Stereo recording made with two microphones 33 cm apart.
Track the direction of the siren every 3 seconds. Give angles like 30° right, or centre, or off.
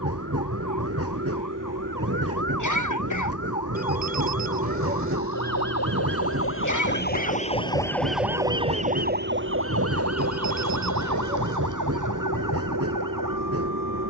70° left, 60° left, 20° left, 50° right, 70° right.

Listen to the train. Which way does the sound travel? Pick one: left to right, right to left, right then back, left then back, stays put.
stays put.